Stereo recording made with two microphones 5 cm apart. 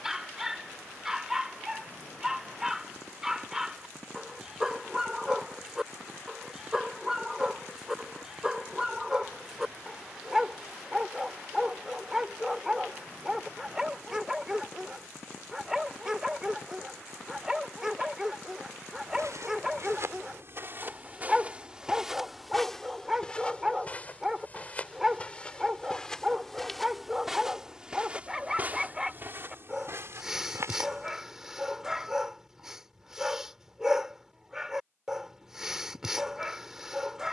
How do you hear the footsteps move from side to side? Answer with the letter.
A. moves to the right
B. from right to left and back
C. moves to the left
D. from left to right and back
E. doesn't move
B.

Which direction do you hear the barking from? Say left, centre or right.
centre.